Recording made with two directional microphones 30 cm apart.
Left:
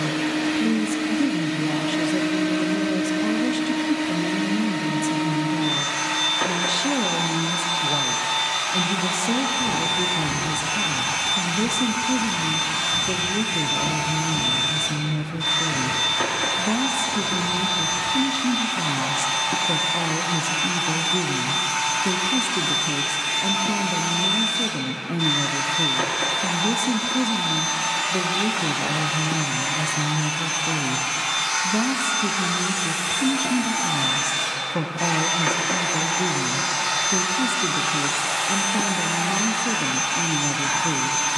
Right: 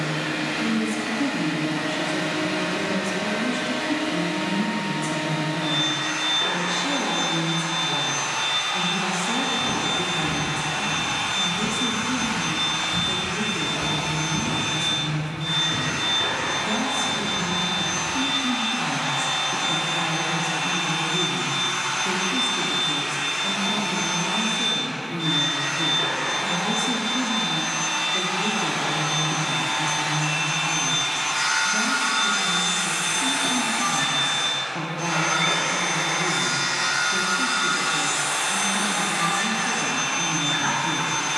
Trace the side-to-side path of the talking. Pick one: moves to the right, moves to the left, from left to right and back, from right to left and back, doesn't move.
doesn't move.